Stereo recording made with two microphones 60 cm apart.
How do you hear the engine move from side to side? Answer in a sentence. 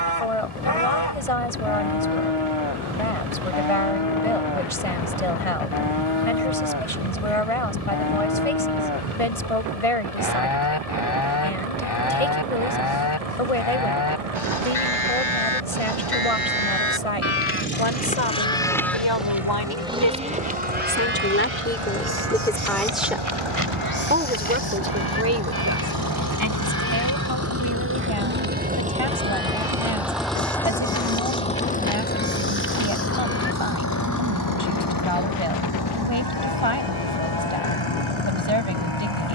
You can hear the engine move to the left.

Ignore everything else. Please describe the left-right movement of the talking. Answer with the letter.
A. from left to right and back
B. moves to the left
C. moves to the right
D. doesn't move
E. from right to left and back
C.